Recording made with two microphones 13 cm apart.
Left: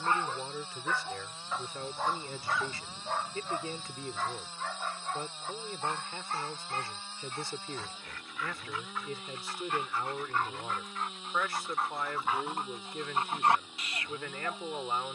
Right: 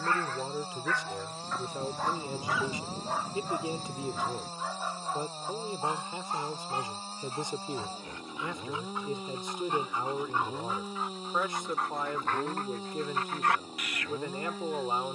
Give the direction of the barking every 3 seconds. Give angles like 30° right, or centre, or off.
10° left, 10° right, 20° right, 10° right, 20° left.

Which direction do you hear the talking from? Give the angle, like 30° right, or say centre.
20° right.